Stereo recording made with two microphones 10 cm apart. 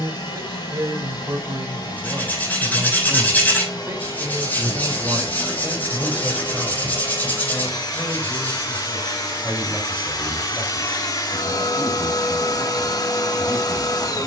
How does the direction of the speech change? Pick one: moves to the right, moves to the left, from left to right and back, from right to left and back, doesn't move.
moves to the left.